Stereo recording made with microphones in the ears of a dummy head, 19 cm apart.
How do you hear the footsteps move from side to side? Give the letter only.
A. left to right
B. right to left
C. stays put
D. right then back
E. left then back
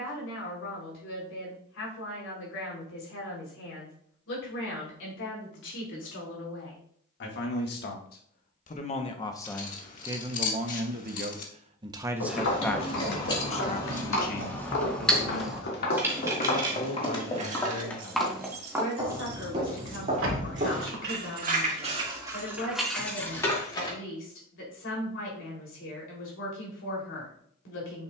A.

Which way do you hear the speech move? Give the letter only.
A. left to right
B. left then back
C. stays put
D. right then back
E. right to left
D.